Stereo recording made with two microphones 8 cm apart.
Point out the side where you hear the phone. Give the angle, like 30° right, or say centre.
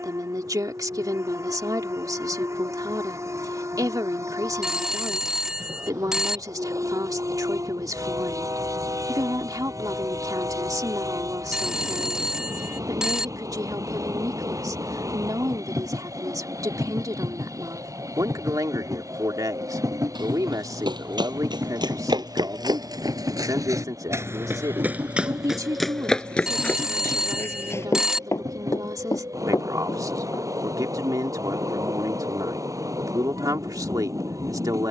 10° right.